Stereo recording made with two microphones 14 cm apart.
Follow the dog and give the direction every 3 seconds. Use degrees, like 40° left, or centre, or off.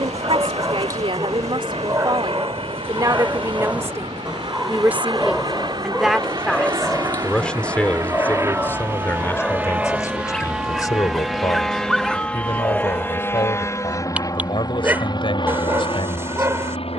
20° right, centre, 10° left, 10° left, 10° right, 20° right.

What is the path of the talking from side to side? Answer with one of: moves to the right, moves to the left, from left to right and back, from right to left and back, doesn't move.
moves to the left.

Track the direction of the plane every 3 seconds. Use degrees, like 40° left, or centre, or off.
50° right, 40° right, 30° right, 10° right, 20° left, 40° left.